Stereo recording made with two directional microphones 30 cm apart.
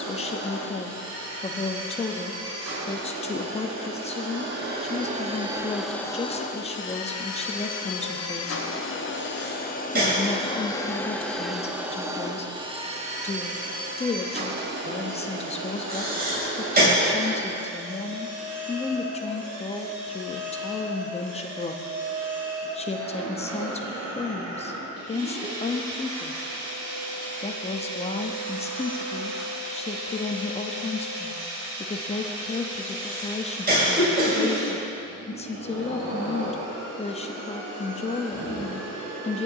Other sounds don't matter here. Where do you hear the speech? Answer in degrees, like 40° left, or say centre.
20° left.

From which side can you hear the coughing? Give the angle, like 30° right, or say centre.
30° right.